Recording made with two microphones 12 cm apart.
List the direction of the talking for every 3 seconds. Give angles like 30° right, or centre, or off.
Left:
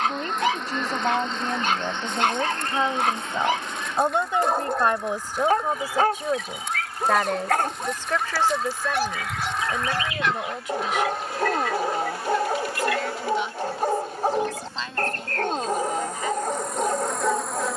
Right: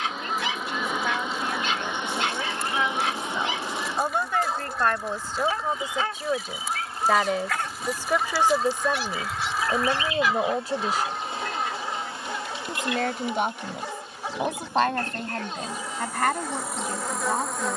40° left, 20° left, 10° right, 30° right, 50° right, 60° right.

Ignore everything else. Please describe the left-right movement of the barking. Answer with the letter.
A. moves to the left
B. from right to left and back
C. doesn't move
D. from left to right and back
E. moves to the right
C.